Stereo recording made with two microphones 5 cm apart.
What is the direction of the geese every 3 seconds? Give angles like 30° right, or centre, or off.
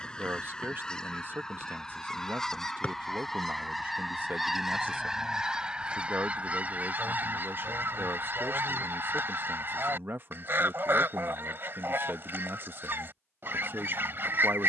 10° left, 10° right, 40° right, 50° right, 50° right.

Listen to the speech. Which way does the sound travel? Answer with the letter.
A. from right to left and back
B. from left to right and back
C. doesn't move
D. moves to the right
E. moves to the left
C.